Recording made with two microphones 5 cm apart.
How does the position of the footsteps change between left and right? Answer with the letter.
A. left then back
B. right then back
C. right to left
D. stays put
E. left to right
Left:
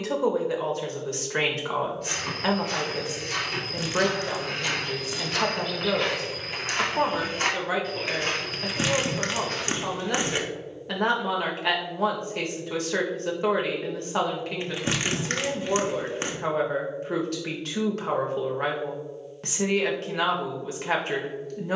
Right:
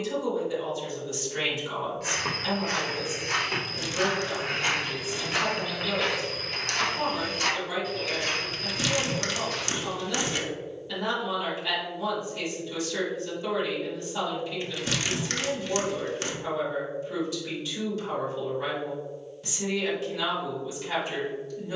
C.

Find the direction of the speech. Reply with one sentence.
You can hear the speech on the left.